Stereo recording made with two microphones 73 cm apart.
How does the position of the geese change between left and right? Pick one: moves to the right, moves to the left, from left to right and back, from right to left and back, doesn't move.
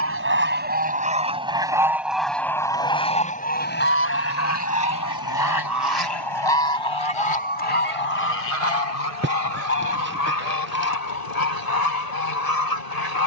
moves to the left.